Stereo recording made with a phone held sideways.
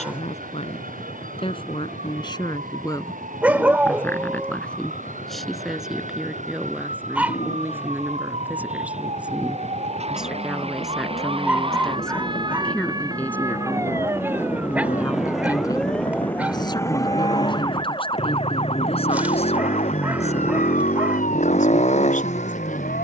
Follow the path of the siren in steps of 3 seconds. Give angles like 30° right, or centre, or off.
60° right, 60° right, 50° right, 40° right, 20° right, 10° left, 50° left, 60° left.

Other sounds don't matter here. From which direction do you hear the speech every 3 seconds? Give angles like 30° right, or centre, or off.
40° left, 10° left, 10° right, centre, 10° left, 30° left, 40° left, 50° left.